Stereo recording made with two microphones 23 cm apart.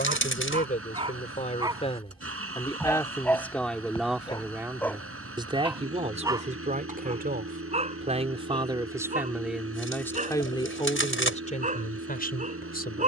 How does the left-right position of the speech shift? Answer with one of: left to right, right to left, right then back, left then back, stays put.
right then back.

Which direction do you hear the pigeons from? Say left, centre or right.
left.